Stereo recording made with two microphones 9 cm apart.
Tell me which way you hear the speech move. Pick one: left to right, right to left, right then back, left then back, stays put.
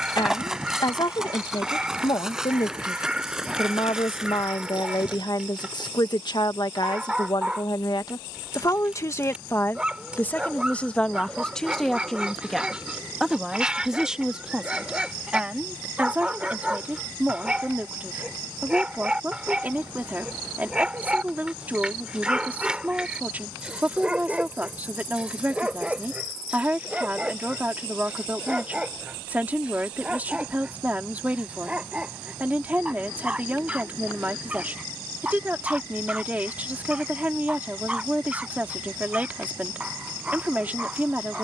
left to right.